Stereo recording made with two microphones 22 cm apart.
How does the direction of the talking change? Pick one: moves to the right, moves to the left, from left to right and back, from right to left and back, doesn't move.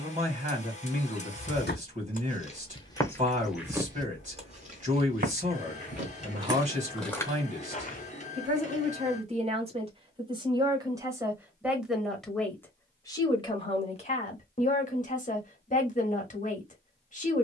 moves to the left.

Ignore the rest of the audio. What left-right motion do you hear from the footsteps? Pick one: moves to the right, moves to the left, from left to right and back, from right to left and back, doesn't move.
from left to right and back.